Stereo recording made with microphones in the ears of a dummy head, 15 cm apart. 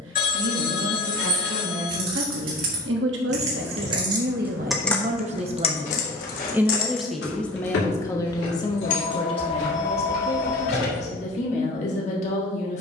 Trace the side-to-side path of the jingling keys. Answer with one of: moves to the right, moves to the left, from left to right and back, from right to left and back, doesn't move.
moves to the left.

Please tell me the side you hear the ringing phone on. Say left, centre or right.
left.